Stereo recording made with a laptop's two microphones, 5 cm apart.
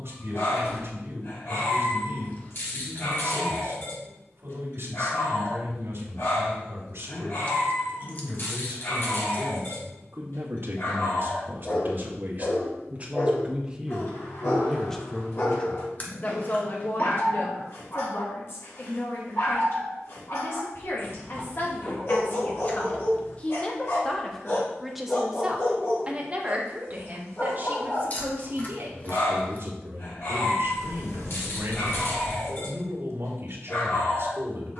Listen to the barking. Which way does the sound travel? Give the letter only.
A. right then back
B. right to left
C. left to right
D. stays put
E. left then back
D.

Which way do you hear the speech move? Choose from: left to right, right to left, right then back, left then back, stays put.
left then back.